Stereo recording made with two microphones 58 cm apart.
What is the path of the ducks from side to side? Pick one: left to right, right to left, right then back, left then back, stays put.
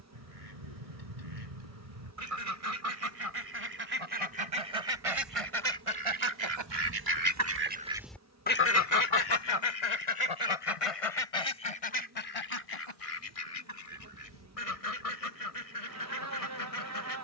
right to left.